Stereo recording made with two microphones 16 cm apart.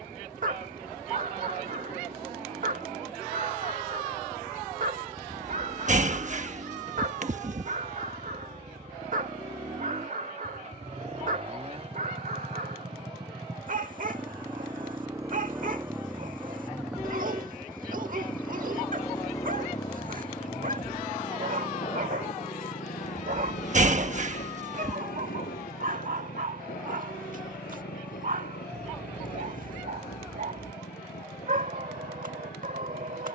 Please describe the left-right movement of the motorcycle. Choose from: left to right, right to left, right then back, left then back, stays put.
right to left.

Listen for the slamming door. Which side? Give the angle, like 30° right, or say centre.
50° right.